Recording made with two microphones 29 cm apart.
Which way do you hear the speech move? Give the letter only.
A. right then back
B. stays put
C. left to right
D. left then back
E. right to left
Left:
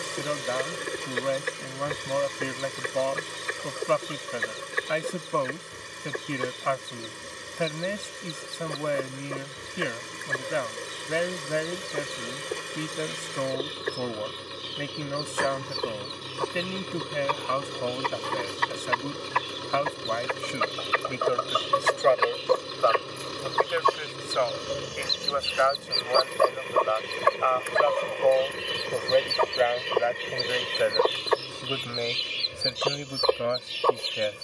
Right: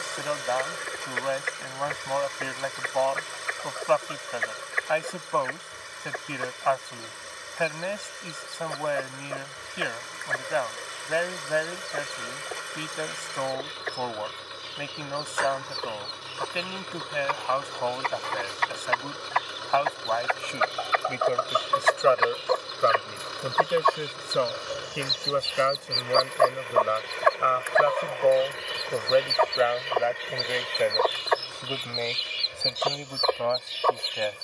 A.